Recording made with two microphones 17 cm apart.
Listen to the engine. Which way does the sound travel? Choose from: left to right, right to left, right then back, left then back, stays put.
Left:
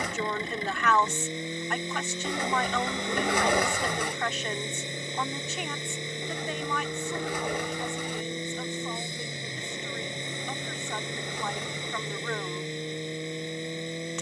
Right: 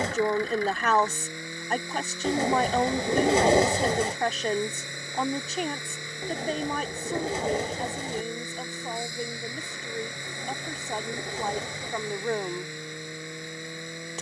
stays put.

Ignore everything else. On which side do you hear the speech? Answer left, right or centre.
right.